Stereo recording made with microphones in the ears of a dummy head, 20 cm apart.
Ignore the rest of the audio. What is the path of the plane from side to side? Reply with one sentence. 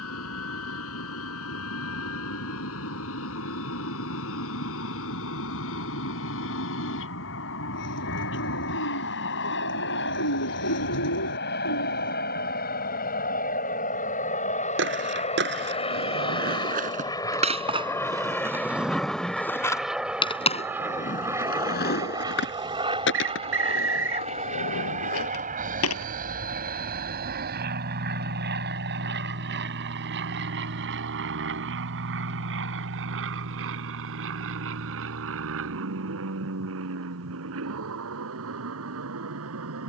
You can hear the plane go from the left side to the right.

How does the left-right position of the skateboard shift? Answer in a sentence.
You can hear the skateboard move from right to left.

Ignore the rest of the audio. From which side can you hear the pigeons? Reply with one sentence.
You can hear the pigeons on the left.